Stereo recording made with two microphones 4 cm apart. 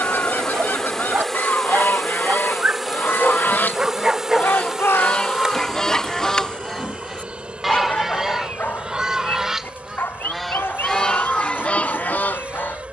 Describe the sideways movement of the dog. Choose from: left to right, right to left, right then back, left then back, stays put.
right to left.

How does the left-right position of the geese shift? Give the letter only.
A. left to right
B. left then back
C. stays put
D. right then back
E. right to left
D.